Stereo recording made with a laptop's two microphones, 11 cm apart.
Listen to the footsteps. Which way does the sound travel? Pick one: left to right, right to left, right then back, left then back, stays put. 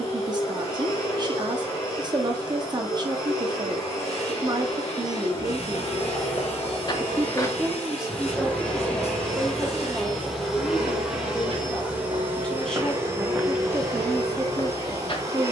right then back.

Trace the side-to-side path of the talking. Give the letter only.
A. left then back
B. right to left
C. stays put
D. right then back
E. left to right
A.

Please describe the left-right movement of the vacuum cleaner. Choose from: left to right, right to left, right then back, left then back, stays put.
left to right.